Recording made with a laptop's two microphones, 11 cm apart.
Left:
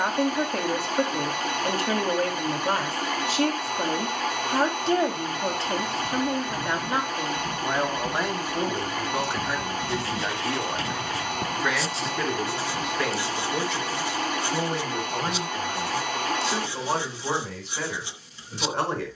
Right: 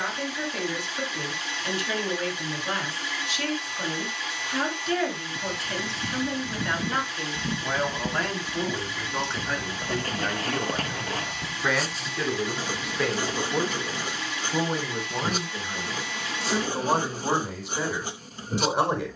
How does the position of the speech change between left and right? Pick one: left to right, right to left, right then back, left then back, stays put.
left to right.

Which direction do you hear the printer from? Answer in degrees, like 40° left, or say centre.
50° left.